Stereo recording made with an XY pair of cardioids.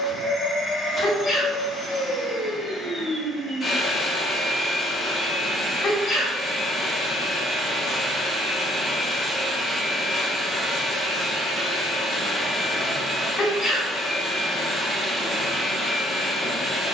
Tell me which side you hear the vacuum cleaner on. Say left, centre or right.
left.